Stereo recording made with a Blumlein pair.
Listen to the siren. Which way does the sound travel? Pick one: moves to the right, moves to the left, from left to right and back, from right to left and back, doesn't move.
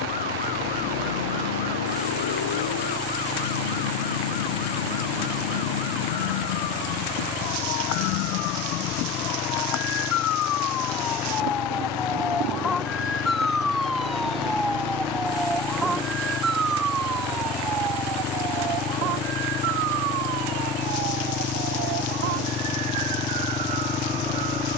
moves to the right.